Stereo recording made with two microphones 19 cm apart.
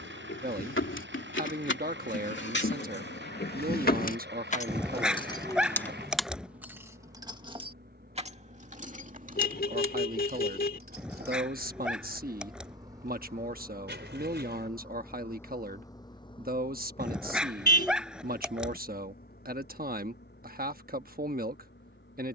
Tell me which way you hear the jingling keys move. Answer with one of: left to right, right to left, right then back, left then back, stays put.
left to right.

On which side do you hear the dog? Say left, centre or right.
centre.